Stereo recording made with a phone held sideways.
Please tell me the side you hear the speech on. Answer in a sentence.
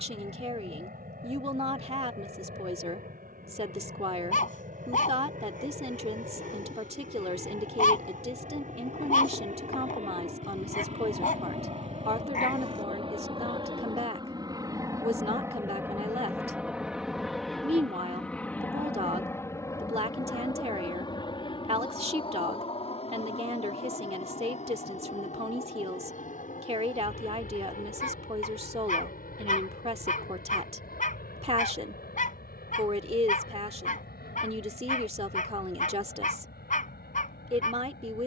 You can hear the speech on the right.